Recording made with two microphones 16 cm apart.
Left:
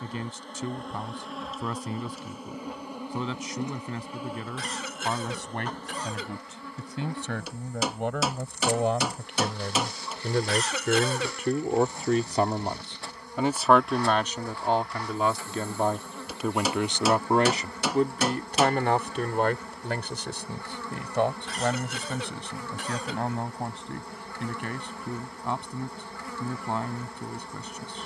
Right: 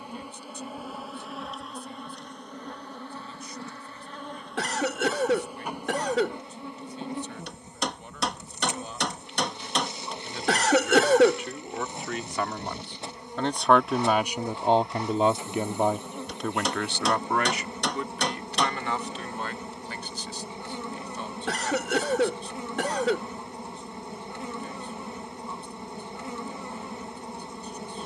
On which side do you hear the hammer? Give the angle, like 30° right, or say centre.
centre.